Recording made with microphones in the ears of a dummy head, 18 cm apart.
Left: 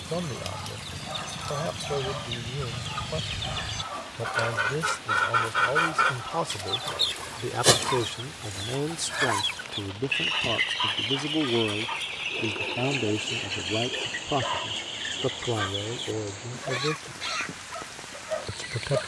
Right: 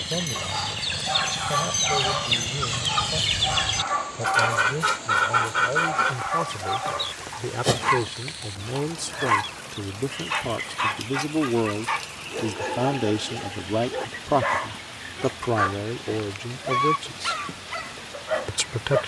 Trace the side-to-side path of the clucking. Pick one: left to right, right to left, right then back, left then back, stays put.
right to left.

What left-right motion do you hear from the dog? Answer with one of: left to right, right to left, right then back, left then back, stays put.
stays put.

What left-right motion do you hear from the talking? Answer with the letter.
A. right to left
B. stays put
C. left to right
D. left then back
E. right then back
C.